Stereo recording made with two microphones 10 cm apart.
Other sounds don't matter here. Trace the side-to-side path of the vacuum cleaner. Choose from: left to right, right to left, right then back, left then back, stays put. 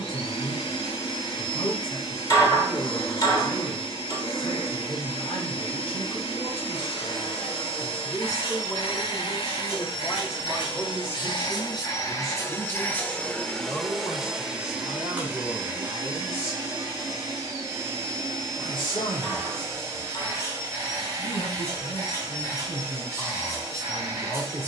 left to right.